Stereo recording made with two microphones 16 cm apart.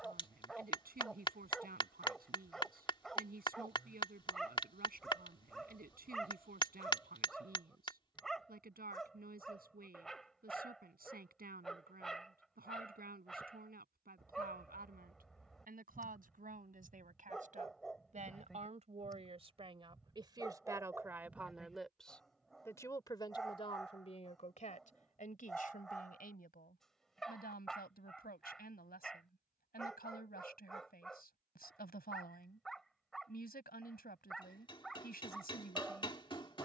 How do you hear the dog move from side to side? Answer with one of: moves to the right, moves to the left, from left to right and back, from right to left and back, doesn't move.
doesn't move.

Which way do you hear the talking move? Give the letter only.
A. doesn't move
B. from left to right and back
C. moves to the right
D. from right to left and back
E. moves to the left
E.